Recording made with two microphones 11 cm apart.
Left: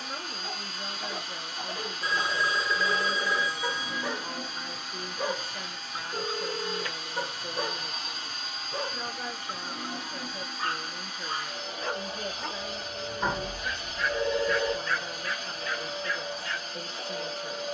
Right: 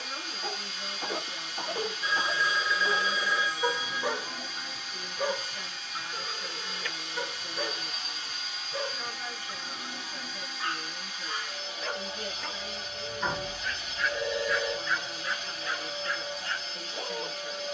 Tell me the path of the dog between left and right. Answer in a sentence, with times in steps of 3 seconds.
In this clip you hear the dog on the right from 0 s, in the centre from 3 s, on the left from 6 s, in the centre from 12 s and on the right from 15 s.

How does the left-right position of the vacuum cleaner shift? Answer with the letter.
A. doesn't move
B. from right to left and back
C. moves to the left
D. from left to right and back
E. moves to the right
A.